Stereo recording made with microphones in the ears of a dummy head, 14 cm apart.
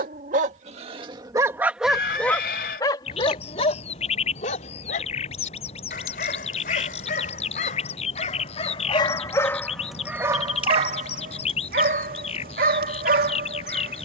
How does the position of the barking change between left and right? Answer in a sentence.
You can hear the barking move from right to left and back again.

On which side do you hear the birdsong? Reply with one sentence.
You can hear the birdsong on the left.